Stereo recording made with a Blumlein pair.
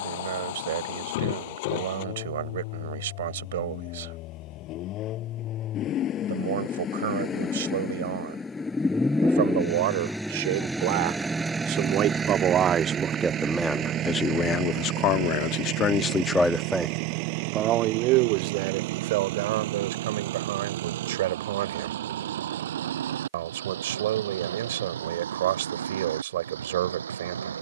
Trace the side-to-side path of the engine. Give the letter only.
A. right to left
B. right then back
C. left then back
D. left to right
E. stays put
D.